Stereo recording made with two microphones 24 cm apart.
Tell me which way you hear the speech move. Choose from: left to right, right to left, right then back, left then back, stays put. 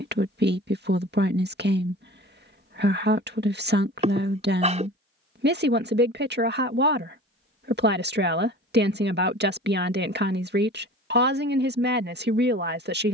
stays put.